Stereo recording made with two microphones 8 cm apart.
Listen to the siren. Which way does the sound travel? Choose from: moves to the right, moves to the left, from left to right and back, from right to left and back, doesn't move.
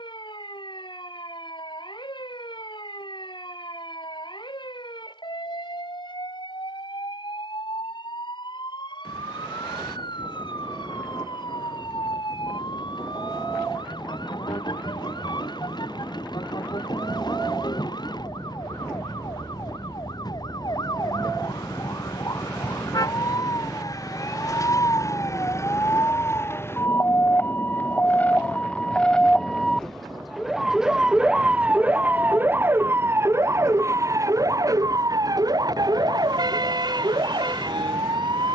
moves to the right.